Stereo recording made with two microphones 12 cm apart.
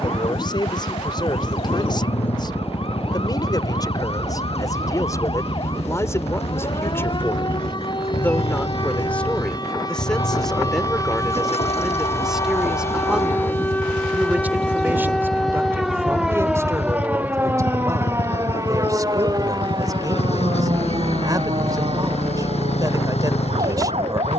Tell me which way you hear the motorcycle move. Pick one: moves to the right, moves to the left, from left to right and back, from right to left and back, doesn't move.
doesn't move.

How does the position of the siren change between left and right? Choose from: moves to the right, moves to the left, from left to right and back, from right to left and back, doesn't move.
moves to the right.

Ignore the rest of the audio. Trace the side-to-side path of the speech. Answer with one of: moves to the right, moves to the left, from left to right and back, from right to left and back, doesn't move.
moves to the right.